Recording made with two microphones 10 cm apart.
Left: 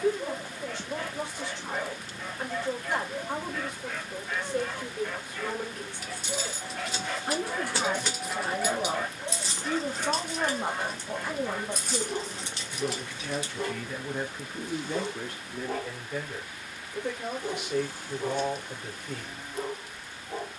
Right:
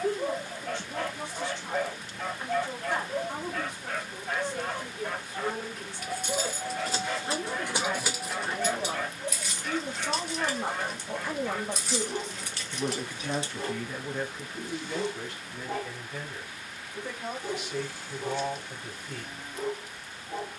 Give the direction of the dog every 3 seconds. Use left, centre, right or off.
right, right, centre, left, left, left, left.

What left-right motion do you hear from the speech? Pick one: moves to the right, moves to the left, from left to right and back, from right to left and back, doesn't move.
from left to right and back.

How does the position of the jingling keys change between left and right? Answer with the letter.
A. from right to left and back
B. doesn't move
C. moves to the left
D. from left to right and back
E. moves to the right
A.